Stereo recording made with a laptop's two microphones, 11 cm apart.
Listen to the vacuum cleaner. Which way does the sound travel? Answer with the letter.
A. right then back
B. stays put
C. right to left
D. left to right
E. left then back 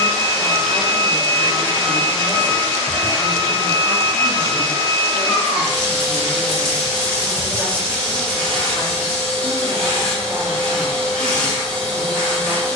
B.